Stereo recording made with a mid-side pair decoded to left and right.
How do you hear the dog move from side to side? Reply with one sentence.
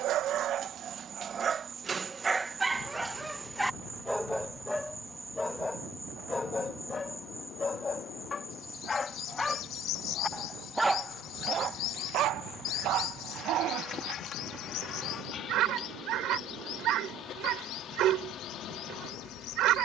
You can hear the dog move from right to left and back again.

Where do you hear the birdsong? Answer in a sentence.
You can hear the birdsong on the left.